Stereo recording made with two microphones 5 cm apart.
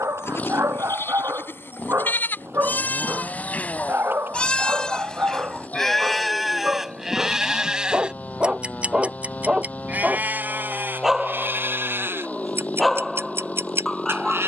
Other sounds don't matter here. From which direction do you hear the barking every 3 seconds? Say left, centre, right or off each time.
right, right, right, centre, centre.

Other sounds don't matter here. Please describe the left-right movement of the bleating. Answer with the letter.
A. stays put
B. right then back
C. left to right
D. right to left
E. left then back
C.